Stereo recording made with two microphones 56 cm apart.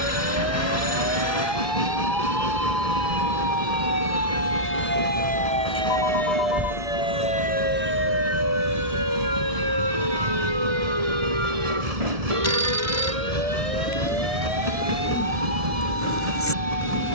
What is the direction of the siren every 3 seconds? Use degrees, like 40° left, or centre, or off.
40° left, 20° left, 10° right, 40° right, 60° right, 70° right.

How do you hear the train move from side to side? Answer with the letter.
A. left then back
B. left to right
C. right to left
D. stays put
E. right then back
D.